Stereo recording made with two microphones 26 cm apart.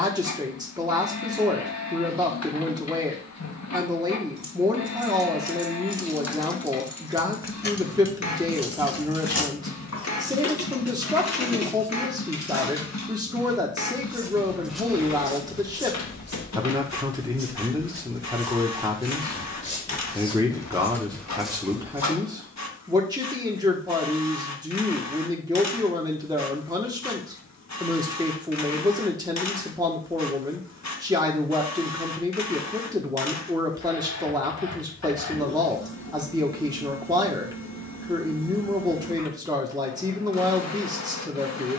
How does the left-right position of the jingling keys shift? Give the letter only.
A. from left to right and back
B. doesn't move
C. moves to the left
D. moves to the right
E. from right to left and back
C.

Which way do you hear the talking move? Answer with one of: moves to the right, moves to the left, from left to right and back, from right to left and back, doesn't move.
doesn't move.